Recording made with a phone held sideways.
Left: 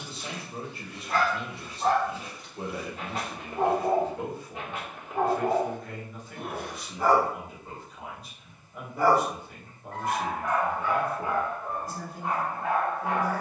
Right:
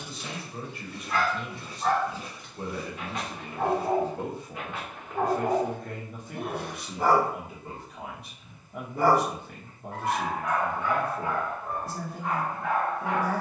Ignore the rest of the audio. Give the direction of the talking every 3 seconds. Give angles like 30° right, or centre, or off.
30° left, 20° right, 60° right, 60° right, 60° right.